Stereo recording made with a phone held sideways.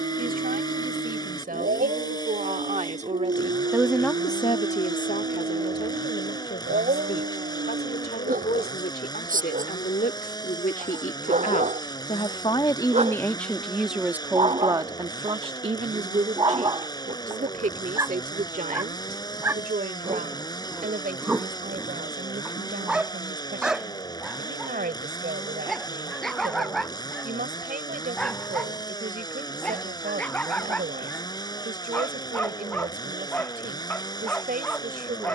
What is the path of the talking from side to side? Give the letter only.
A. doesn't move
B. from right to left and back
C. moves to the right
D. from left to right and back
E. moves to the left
B.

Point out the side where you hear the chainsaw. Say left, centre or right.
left.